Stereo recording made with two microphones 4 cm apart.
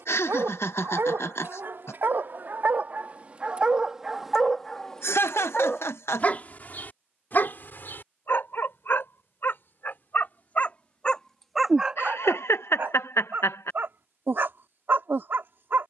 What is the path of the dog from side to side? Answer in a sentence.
In this clip you hear the dog go left and come back.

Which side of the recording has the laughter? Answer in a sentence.
In this clip you hear the laughter on the left.